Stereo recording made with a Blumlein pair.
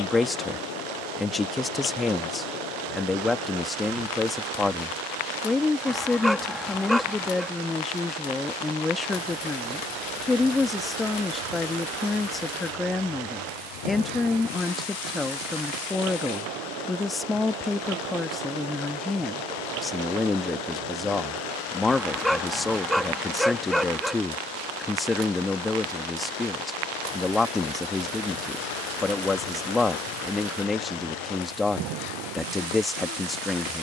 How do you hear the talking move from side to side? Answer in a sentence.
In this clip you hear the talking stay put.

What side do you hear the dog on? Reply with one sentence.
You can hear the dog in the centre.